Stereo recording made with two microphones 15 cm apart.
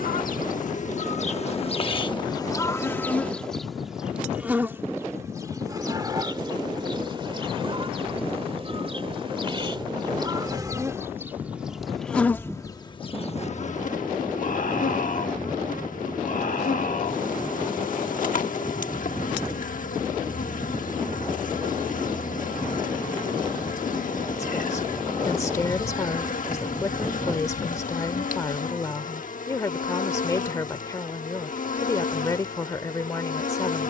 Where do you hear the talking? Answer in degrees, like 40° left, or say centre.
20° left.